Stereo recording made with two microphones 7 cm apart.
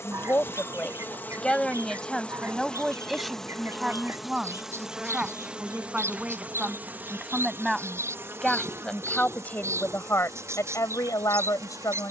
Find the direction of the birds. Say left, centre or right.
right.